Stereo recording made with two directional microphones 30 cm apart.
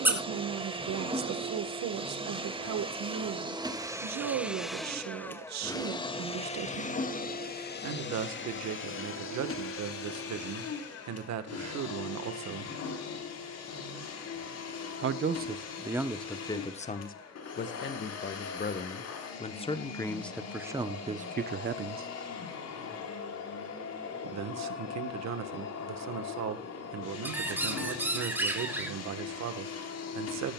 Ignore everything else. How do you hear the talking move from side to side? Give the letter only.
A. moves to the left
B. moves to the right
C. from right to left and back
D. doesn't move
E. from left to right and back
C.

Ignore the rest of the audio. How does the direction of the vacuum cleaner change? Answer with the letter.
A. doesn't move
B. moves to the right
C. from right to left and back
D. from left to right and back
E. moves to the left
E.